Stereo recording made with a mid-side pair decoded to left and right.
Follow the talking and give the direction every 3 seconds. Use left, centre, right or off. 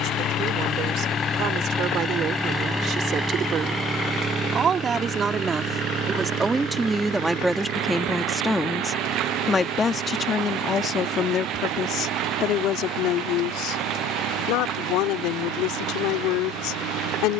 right, right, centre, left, left, left.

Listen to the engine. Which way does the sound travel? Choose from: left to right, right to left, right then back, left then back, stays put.
left to right.